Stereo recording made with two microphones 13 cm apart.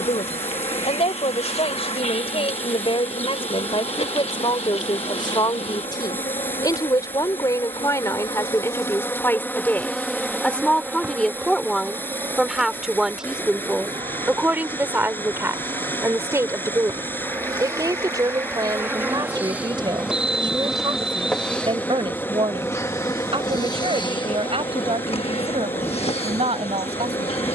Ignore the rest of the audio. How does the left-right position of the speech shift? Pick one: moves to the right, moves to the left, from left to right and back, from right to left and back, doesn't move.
moves to the right.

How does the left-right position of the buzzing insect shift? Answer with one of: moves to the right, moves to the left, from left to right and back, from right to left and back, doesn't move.
from left to right and back.